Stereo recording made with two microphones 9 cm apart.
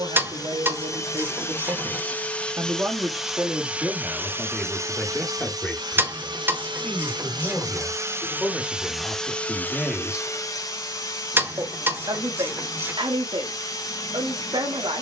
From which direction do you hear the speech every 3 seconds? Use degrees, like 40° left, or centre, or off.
50° right, centre, 10° left, 10° right, 60° right.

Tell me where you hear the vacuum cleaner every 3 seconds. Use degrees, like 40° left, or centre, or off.
20° left, 30° right, 40° right, 30° left, 40° left.